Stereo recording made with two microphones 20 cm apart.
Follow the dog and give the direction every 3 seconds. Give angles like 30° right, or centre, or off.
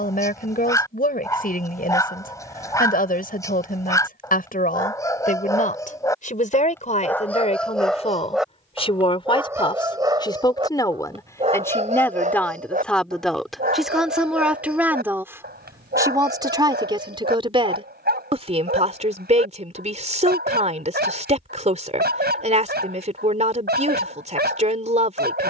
20° left, 20° left, centre, 20° right, 50° right, 60° right, 60° right, 60° right, 60° right.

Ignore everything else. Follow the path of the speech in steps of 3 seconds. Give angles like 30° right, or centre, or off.
50° left, 50° left, 40° left, 20° left, centre, 20° right, 30° right, 30° right, 30° right.